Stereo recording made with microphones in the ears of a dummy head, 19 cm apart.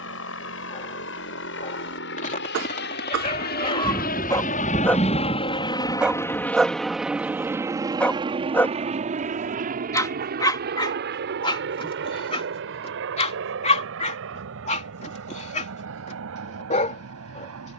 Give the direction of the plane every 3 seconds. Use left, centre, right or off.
left, left, centre, right, right, right.